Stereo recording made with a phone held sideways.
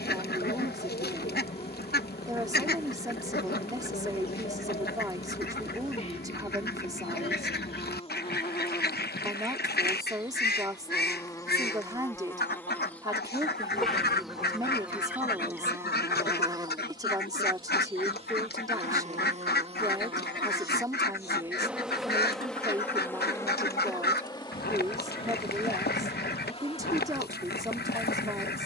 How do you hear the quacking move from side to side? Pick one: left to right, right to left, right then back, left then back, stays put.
stays put.